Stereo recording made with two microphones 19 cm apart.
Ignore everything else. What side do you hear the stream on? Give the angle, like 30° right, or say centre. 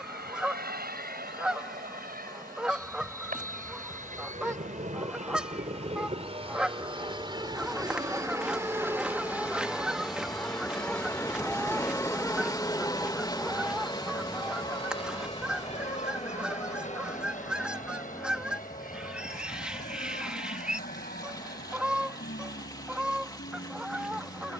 20° left.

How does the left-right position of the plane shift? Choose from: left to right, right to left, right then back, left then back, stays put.
right to left.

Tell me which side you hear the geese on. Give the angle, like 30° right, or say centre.
centre.